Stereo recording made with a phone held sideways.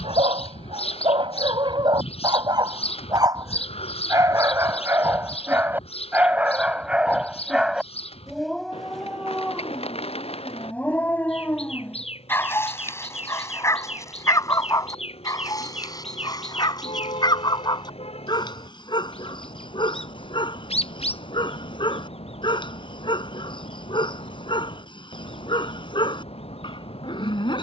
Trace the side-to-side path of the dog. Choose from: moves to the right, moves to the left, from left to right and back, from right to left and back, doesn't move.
moves to the left.